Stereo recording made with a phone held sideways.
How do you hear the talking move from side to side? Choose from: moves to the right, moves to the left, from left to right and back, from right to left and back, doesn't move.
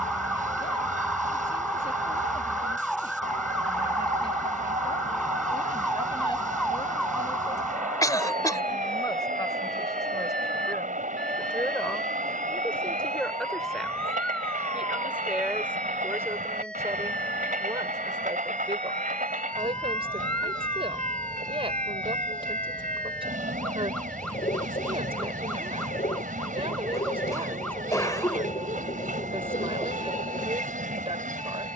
moves to the right.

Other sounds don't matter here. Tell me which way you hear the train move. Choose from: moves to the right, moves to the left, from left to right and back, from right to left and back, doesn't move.
doesn't move.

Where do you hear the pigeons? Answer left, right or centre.
left.